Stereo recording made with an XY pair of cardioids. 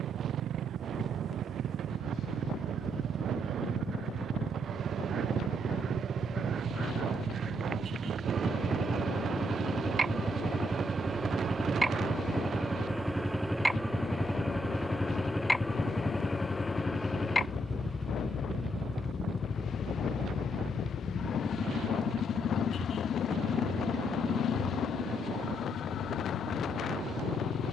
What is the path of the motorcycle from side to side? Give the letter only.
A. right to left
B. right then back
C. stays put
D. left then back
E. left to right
A.